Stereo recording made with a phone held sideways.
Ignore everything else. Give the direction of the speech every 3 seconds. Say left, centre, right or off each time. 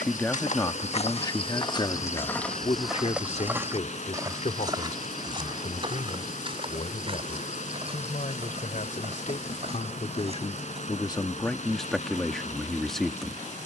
left, left, left, left, centre.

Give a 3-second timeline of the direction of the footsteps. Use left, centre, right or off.
left, right, right, right, off.